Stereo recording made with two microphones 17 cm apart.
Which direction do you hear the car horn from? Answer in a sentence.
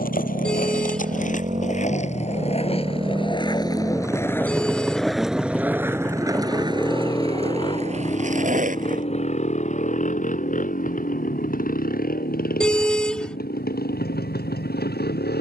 In this clip you hear the car horn in the centre.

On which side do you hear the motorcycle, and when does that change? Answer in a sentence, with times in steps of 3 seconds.
You can hear the motorcycle on the right from 0 s, in the centre from 3 s and on the left from 6 s.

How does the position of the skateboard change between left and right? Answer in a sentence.
You can hear the skateboard move to the right.